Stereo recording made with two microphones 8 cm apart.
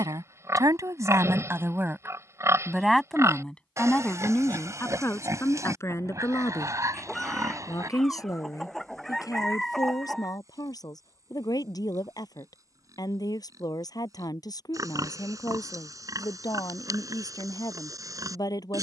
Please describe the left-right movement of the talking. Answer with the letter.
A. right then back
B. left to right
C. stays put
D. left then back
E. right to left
E.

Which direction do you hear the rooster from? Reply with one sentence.
In this clip you hear the rooster in the centre.